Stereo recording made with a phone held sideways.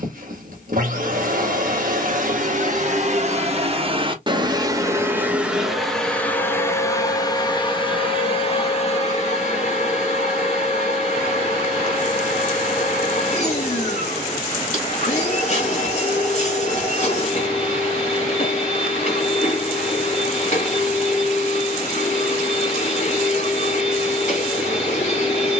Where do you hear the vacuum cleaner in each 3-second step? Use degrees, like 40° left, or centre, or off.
60° right, 20° right, 30° left, 40° left, 40° left, 40° left, 40° left, 40° left, 40° left.